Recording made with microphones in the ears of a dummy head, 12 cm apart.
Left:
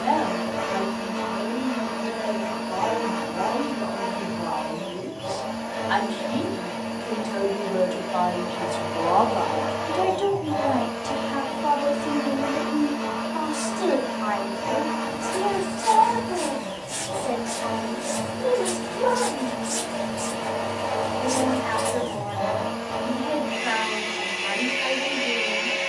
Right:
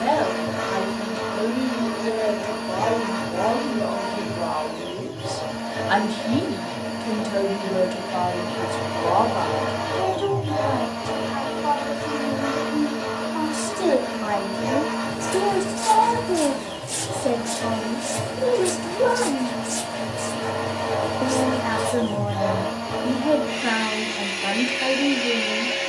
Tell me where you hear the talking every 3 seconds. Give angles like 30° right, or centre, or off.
70° right, 60° right, 30° right, 20° left, 10° right, 60° right, 60° right, 60° right, 60° right.